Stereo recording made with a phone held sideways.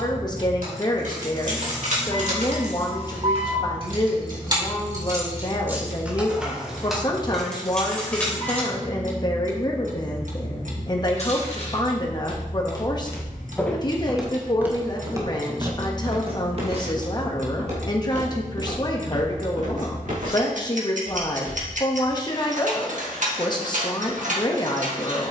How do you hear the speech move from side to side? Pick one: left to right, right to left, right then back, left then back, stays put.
stays put.